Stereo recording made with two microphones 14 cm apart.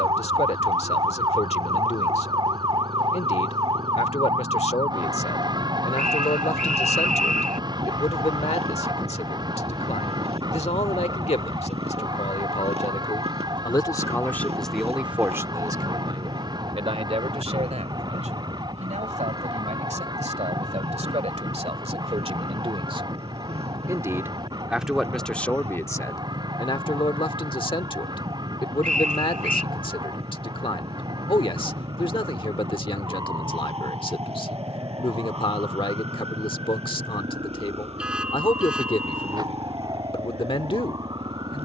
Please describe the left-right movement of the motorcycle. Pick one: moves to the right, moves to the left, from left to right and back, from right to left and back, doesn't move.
doesn't move.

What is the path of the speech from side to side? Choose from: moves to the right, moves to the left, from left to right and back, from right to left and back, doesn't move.
from left to right and back.